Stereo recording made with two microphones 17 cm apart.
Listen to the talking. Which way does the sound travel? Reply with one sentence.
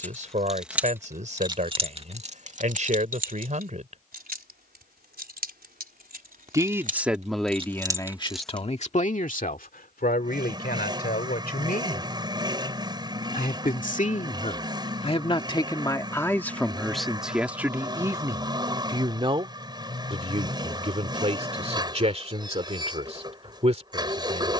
You can hear the talking move from right to left and back again.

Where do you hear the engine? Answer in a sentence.
In this clip you hear the engine on the right.